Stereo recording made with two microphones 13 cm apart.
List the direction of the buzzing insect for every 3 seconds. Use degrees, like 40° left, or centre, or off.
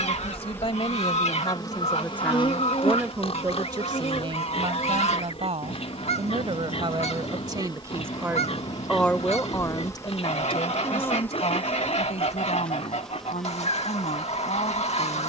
30° left, 50° left, 30° left, 20° left, centre.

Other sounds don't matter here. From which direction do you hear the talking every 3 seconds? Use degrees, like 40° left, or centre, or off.
30° left, 40° right, 30° right, 40° left, 70° left.